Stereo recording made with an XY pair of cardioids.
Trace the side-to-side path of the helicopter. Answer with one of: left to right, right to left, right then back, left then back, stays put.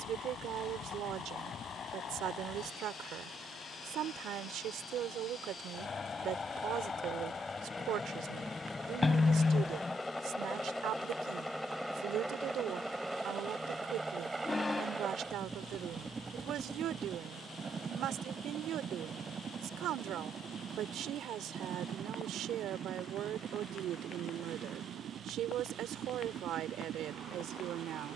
left to right.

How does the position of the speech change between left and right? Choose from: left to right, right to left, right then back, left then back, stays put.
stays put.